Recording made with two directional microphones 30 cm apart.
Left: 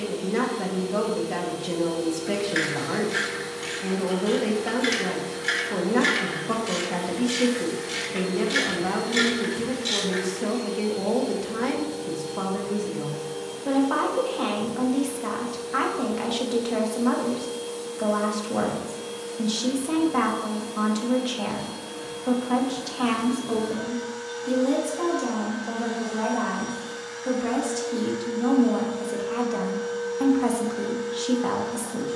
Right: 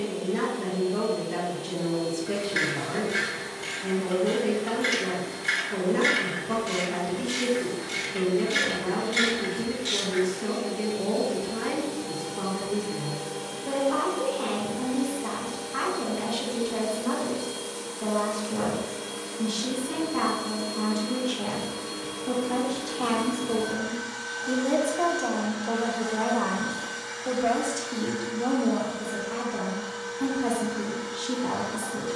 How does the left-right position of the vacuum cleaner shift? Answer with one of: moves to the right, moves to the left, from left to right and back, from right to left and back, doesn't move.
moves to the right.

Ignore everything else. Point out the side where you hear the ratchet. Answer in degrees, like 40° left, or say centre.
20° left.